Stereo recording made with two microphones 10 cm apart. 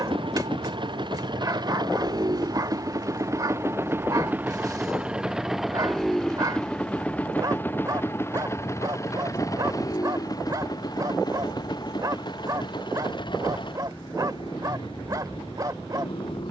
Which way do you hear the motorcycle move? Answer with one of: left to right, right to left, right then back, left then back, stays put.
right to left.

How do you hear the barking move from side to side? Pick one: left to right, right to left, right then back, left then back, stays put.
stays put.